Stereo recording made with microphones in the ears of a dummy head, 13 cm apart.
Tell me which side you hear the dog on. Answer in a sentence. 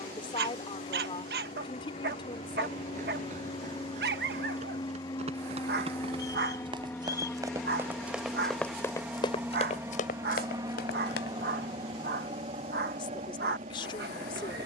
You can hear the dog on the right.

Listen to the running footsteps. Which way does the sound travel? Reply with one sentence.
You can hear the running footsteps travel towards the left.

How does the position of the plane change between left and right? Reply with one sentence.
You can hear the plane move to the right.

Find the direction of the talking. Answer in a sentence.
You can hear the talking on the left.